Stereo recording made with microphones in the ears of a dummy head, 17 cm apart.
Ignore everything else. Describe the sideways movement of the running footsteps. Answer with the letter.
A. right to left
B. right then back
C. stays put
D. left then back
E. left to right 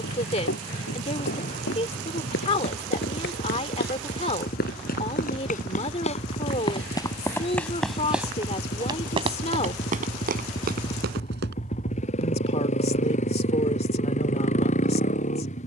E.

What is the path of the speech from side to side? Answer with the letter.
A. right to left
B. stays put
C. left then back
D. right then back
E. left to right
B.